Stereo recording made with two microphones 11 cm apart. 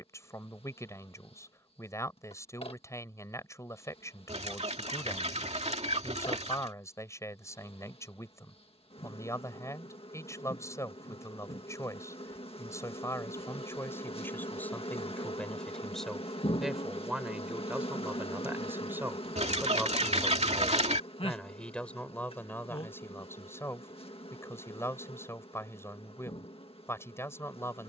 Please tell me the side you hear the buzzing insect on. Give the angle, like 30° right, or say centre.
60° left.